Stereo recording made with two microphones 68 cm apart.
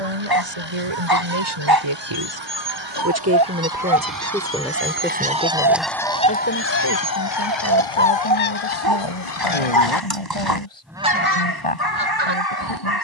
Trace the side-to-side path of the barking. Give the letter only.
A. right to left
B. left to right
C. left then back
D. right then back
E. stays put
E.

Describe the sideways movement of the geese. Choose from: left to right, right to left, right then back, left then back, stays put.
left then back.